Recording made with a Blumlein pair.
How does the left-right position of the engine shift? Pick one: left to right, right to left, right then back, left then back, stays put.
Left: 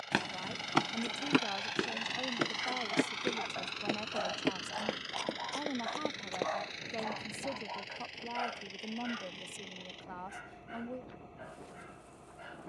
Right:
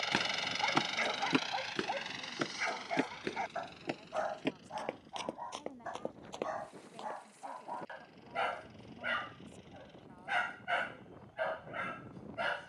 right to left.